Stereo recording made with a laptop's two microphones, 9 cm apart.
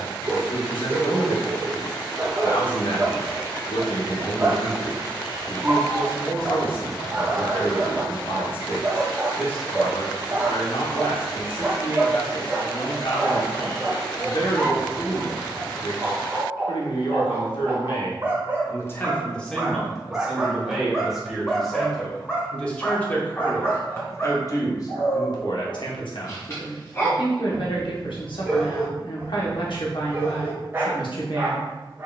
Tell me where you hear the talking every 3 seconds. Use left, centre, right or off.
left, left, left, left, left, left, centre, centre, left, left, left.